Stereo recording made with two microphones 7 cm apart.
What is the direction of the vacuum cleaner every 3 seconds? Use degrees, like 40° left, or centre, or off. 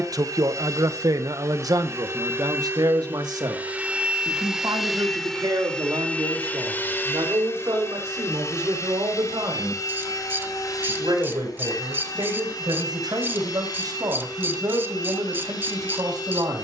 50° right, 10° right, 40° left, 60° left, 70° left, 70° left.